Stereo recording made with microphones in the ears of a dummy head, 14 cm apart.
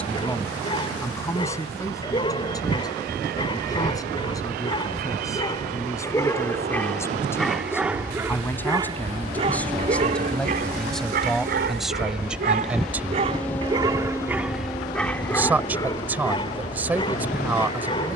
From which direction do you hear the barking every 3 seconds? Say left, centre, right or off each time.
left, left, centre, right, right, left.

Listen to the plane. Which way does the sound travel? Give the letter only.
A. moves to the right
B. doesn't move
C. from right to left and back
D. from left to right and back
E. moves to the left
E.